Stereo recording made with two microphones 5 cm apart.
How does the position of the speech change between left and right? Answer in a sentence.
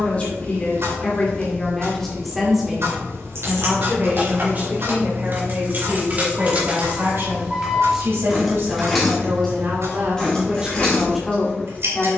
You can hear the speech move from left to right and back again.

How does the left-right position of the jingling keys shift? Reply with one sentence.
You can hear the jingling keys go from the right side to the left.